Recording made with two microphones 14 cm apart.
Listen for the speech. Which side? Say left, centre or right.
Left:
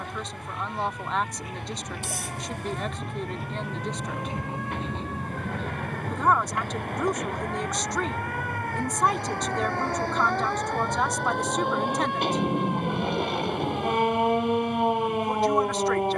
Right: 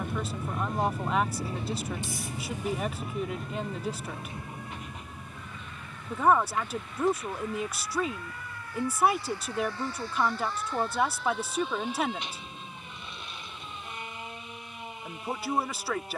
centre.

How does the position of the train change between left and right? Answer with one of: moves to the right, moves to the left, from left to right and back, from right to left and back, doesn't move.
moves to the left.